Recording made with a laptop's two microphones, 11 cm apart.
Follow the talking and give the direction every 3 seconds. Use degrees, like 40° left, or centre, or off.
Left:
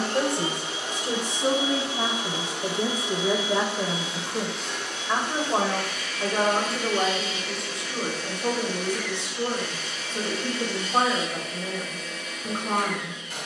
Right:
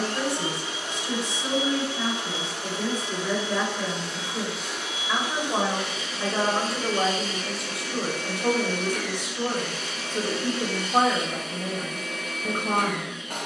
40° left, 20° left, centre, 10° right, 10° right.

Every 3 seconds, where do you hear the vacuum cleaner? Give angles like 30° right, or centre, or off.
20° left, centre, 40° right, 50° right, 50° right.